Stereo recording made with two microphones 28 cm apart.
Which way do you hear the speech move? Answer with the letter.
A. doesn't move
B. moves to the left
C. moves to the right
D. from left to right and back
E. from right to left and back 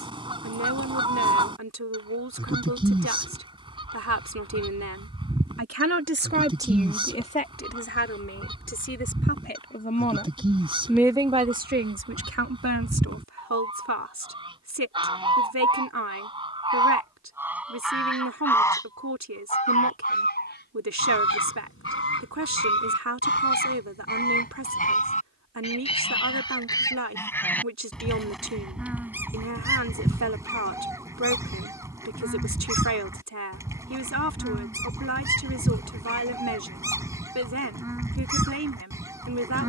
E.